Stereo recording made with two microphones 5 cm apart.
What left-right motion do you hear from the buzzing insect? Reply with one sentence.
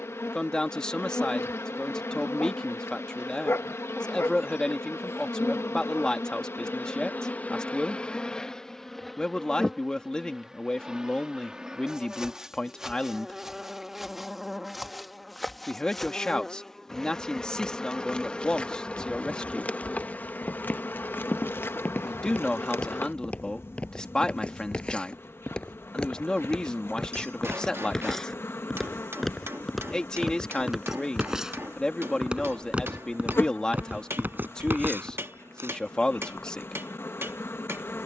In this clip you hear the buzzing insect move from left to right and back again.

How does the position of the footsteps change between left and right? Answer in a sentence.
In this clip you hear the footsteps travel towards the right.